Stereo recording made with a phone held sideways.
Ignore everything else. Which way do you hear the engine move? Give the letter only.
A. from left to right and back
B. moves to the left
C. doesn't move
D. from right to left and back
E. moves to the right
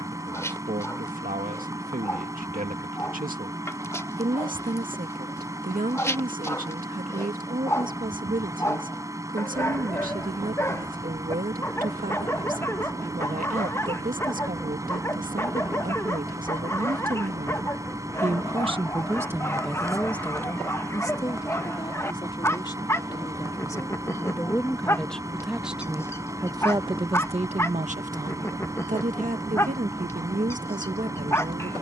C.